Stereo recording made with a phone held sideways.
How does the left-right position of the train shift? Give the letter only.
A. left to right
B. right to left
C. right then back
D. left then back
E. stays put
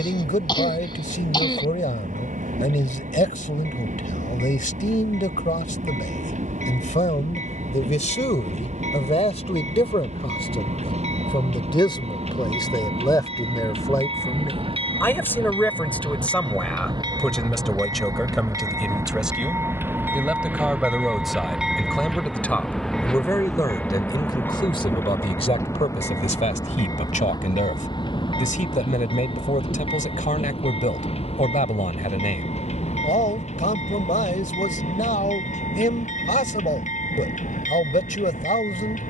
B.